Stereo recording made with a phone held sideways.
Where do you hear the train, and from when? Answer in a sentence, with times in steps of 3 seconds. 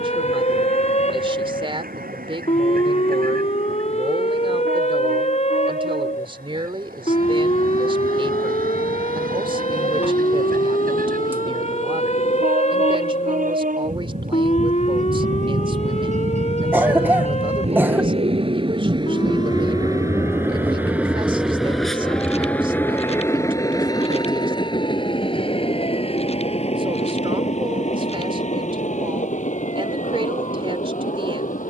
You can hear the train on the right from 0 s, in the centre from 21 s and on the left from 24 s.